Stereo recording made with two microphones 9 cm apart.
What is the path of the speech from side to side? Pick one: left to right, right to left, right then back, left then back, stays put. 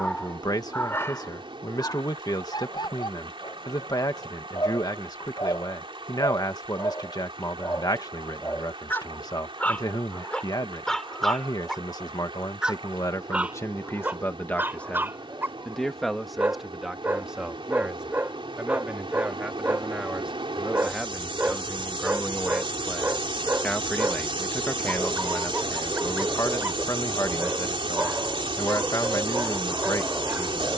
right then back.